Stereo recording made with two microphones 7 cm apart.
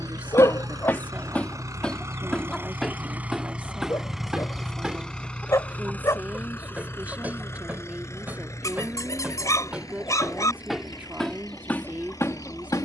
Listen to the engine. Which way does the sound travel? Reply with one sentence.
In this clip you hear the engine move from right to left.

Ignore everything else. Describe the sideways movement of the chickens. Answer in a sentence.
In this clip you hear the chickens move from left to right and back again.